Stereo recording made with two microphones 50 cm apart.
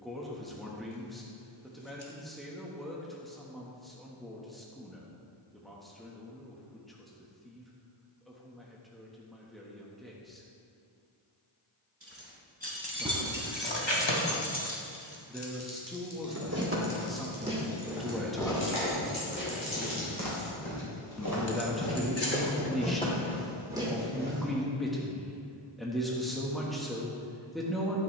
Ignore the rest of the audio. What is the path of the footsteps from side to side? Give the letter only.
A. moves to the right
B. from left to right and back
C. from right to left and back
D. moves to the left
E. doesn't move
C.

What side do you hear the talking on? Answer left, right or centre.
centre.